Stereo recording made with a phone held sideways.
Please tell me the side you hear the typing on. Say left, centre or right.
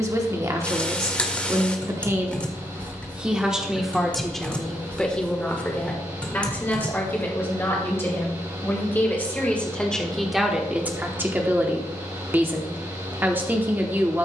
centre.